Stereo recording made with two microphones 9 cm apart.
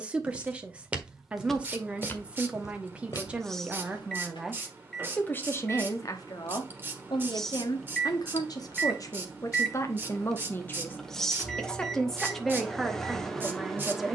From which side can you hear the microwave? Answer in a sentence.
In this clip you hear the microwave in the centre.